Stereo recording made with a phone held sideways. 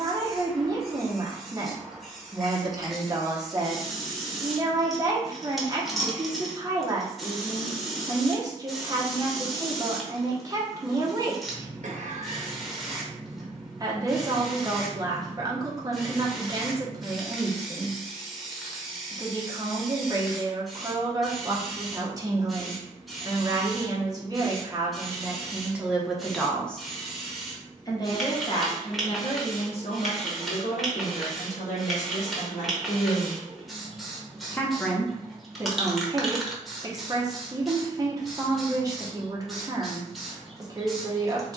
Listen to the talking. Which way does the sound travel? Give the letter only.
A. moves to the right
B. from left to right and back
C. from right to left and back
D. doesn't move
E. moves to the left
C.